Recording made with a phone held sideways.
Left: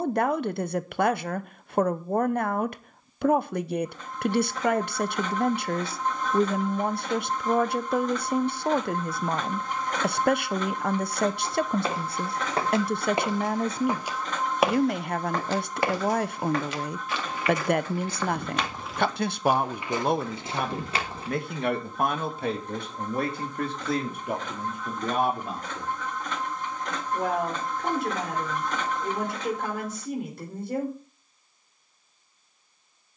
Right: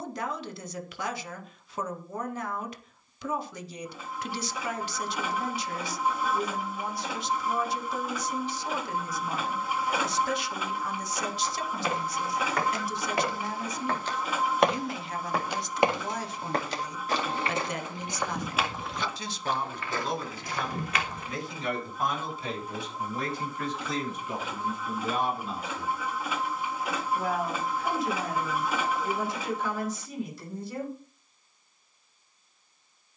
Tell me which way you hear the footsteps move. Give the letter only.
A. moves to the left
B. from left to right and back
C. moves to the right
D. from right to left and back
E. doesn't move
B.